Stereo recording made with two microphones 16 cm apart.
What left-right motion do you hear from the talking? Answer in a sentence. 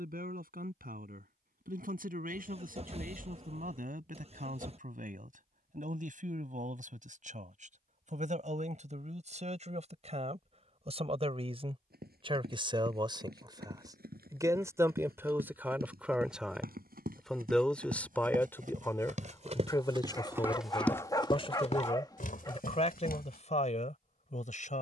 You can hear the talking travel towards the left.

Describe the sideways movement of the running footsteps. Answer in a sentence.
In this clip you hear the running footsteps move from right to left.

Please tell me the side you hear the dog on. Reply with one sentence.
In this clip you hear the dog on the left.